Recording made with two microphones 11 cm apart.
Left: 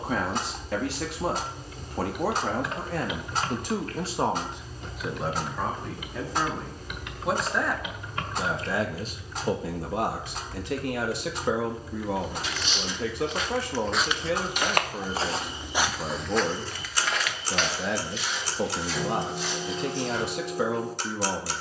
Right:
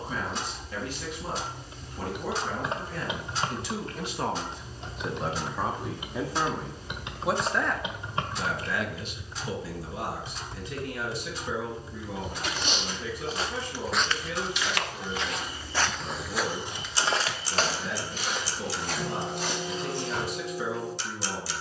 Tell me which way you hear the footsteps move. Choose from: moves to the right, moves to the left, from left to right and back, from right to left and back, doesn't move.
from right to left and back.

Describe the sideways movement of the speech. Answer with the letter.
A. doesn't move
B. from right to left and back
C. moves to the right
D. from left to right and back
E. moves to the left
D.